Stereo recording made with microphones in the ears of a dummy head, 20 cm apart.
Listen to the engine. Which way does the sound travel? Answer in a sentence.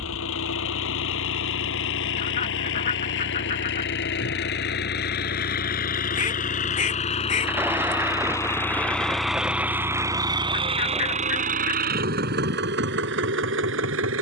In this clip you hear the engine go from the left side to the right.